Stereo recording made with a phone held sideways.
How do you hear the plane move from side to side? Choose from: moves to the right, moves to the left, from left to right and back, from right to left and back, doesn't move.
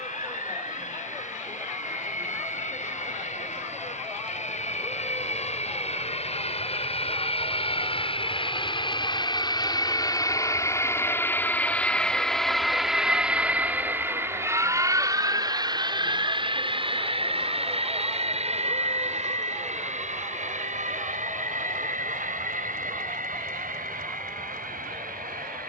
moves to the right.